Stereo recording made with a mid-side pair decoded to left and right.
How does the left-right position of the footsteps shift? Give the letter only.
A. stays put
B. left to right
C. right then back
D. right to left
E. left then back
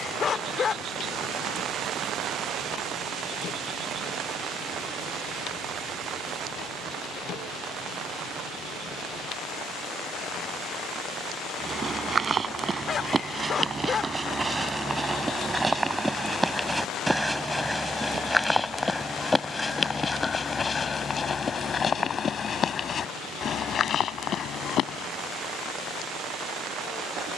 D.